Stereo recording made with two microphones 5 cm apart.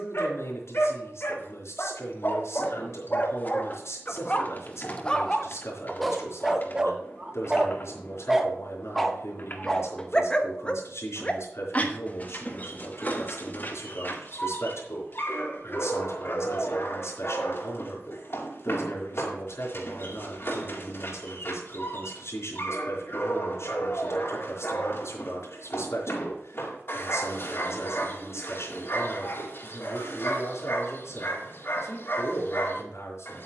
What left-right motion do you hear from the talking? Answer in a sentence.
You can hear the talking stay put.